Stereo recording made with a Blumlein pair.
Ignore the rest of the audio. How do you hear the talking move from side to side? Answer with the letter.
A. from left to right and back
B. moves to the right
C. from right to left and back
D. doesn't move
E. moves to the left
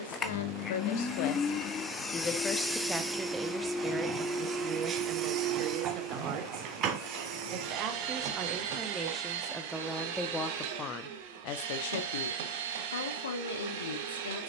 A.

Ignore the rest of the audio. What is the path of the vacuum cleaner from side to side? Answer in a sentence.
In this clip you hear the vacuum cleaner move from left to right.